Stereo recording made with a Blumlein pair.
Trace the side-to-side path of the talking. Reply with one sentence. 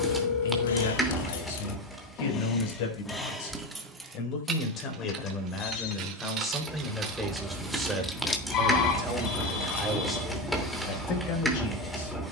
In this clip you hear the talking move from left to right and back again.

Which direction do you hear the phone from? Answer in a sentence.
You can hear the phone on the left.